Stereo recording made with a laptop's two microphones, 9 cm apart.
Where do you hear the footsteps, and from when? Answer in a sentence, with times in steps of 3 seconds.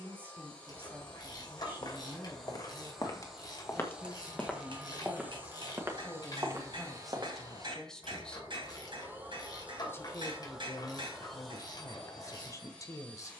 In this clip you hear the footsteps on the left from 0 s, in the centre from 3 s, on the right from 6 s and not at all from 9 s.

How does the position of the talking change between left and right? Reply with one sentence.
You can hear the talking move to the left.